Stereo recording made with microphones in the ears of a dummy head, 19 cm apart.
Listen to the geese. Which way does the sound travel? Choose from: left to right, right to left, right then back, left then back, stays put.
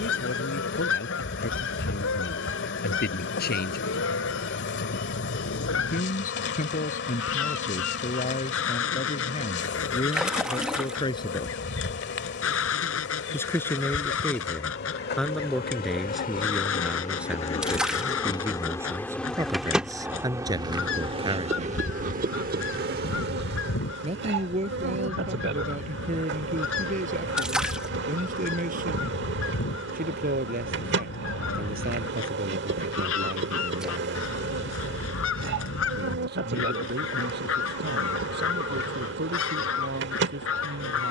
stays put.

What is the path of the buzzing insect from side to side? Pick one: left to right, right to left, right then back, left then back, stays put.
left to right.